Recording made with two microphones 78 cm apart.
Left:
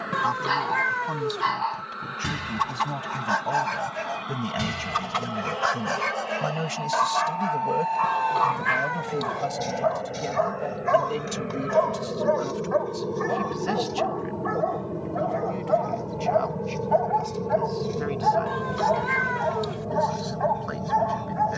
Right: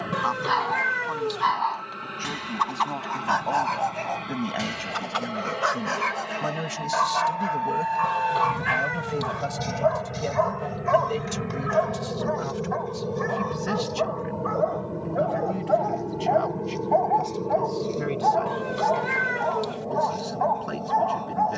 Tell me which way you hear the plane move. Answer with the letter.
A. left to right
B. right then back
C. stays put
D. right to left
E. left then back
D.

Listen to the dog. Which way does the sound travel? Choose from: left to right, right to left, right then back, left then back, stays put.
right then back.